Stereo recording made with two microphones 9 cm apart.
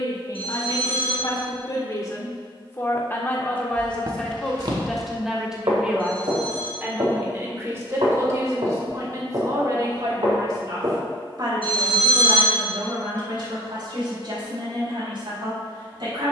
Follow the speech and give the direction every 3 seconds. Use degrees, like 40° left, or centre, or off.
40° left, 10° left, 30° right, 50° right, 60° right, 60° right.